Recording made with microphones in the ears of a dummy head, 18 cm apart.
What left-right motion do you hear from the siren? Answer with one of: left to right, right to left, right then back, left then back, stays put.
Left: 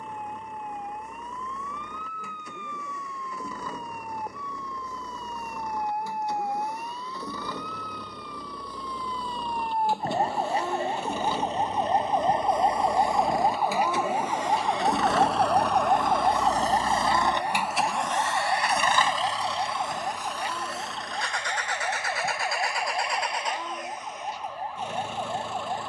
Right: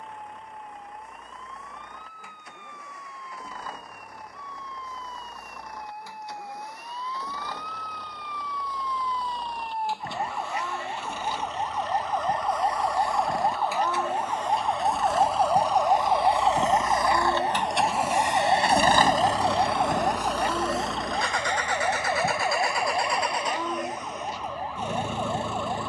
left to right.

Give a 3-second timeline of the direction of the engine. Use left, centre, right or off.
left, left, left, left, left, left, right, right, right.